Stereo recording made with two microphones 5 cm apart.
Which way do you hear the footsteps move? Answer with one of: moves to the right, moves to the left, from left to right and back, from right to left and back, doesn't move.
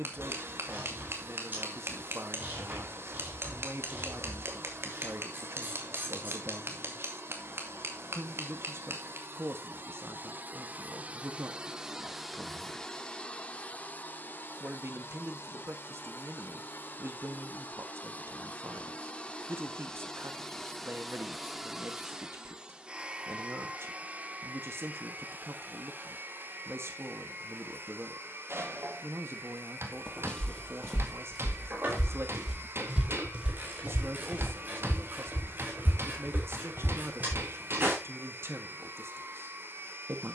moves to the right.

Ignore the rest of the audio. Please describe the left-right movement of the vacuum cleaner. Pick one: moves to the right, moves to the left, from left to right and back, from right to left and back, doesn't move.
from right to left and back.